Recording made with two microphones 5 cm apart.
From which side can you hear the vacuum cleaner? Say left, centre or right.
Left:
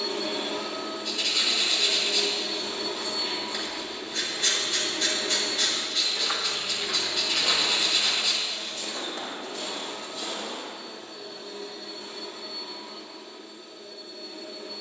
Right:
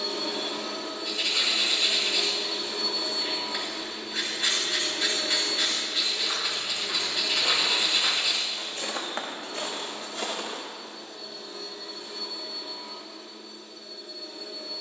left.